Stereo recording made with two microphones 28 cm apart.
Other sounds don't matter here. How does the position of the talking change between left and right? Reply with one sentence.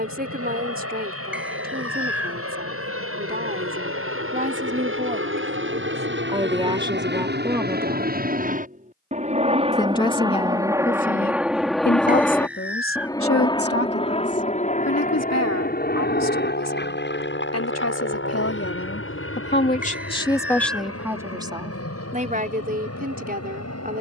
In this clip you hear the talking go left and come back.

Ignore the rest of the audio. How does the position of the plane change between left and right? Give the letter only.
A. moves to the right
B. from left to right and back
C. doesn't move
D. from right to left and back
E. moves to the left
E.